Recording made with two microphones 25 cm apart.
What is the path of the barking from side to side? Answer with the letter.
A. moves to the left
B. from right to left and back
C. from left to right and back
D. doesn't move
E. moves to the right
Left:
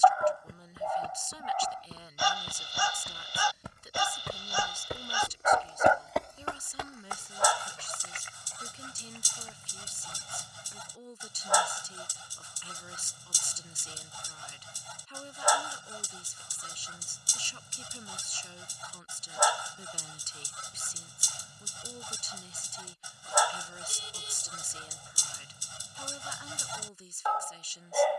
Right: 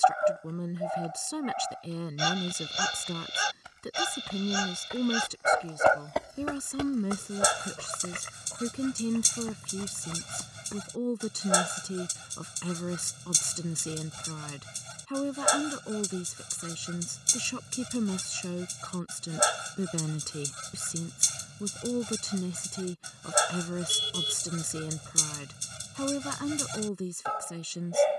D.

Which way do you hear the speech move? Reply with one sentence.
You can hear the speech stay put.